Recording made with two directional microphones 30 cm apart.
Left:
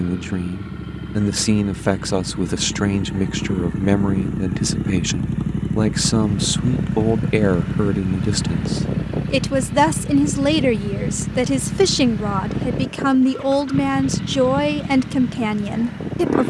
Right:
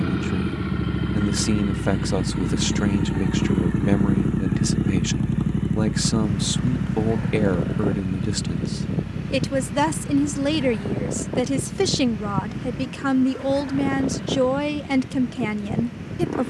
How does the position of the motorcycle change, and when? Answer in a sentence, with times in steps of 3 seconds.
In this clip you hear the motorcycle on the right from 0 s, in the centre from 3 s and on the left from 6 s.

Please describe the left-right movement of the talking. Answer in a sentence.
In this clip you hear the talking stay put.